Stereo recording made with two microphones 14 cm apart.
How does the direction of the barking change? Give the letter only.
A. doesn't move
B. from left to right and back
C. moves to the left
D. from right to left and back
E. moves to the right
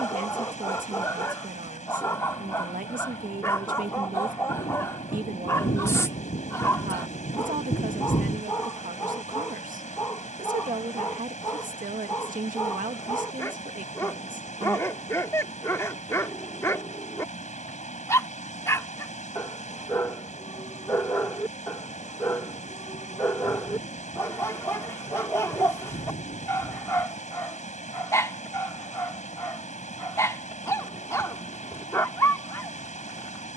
A.